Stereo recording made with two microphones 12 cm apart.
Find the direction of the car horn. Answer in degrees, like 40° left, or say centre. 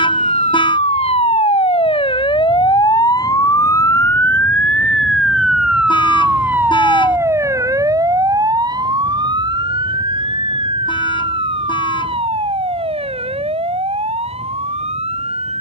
40° left.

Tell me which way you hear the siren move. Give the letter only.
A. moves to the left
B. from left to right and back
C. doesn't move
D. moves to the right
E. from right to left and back
D.